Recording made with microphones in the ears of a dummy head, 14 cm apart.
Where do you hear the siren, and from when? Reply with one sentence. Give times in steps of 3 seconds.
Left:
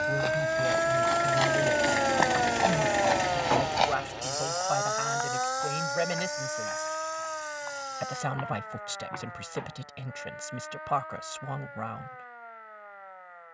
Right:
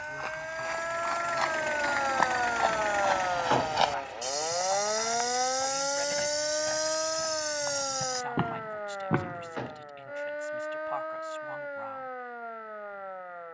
In this clip you hear the siren on the left from 0 s, in the centre from 3 s and on the right from 6 s.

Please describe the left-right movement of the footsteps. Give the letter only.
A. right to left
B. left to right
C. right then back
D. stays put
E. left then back
B.